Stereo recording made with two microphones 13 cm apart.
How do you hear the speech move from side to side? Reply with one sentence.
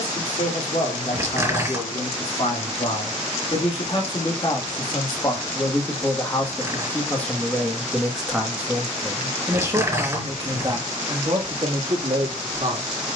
In this clip you hear the speech go from the left side to the right.